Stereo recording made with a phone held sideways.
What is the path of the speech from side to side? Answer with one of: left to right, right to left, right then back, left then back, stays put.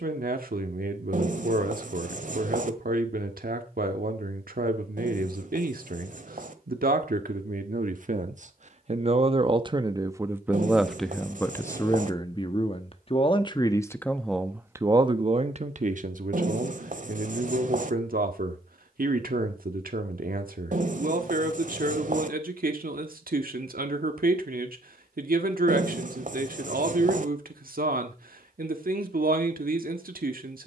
left then back.